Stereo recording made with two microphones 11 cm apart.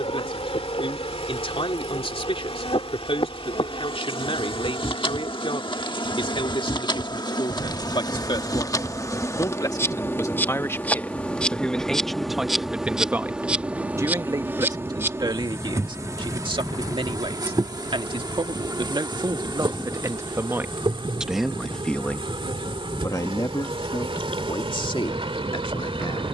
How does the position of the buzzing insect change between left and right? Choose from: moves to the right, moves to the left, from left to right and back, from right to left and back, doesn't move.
moves to the right.